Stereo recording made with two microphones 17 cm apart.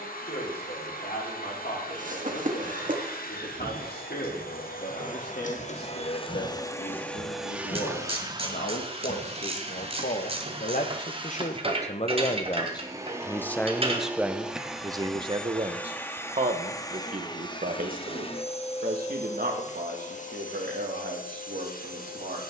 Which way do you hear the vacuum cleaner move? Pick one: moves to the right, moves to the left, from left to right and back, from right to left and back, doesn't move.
from left to right and back.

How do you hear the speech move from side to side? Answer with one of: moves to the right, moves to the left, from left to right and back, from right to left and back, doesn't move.
moves to the right.